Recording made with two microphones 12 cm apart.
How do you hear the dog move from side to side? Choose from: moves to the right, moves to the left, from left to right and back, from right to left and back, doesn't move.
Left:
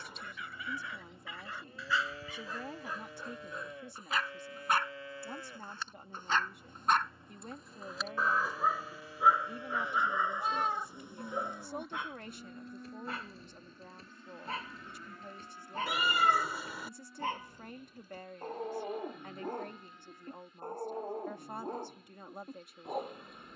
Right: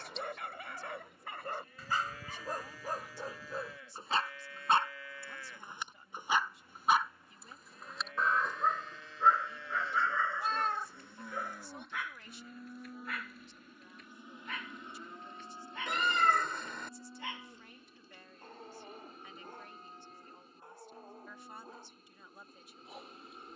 moves to the left.